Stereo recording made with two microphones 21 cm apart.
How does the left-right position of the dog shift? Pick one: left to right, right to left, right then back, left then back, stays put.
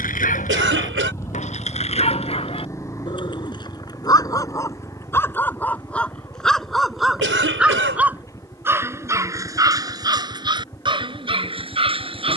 left to right.